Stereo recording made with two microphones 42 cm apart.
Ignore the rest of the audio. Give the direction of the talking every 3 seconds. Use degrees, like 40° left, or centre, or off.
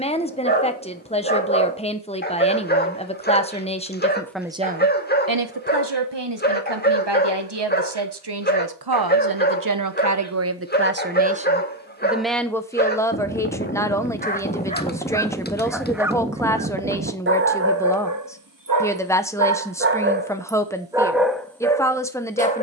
10° left, 10° right, 70° right, 40° right, 10° left, 10° left, 10° left, 10° left.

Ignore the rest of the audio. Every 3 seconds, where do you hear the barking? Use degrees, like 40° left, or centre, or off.
20° left, 20° left, 20° left, 20° left, 20° left, 10° right, 30° right, 10° left.